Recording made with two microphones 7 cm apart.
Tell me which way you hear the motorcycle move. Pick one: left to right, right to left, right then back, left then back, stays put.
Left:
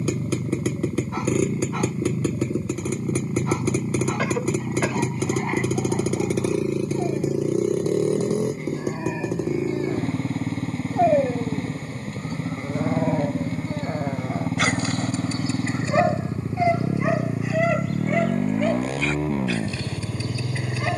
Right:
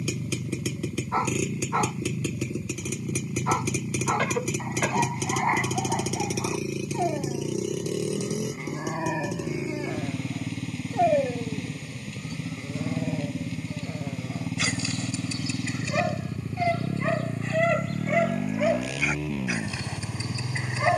stays put.